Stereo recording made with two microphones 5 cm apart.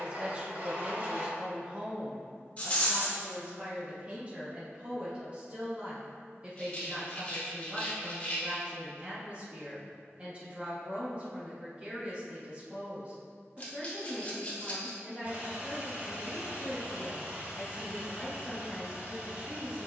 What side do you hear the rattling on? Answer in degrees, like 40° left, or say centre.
30° left.